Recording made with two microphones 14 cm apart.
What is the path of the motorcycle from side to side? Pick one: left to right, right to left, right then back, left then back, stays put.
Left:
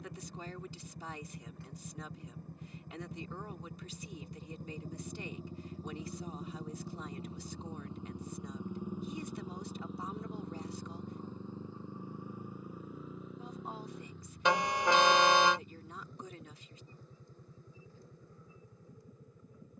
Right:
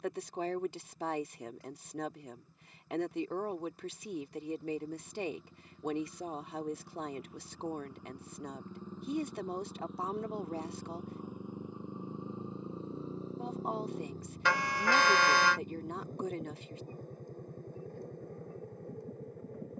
left to right.